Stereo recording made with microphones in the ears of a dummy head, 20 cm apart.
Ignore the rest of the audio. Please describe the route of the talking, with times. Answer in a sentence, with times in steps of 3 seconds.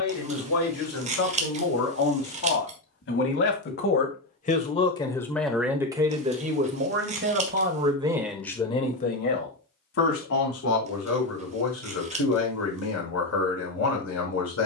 In this clip you hear the talking on the left from 0 s, on the right from 6 s and on the left from 9 s.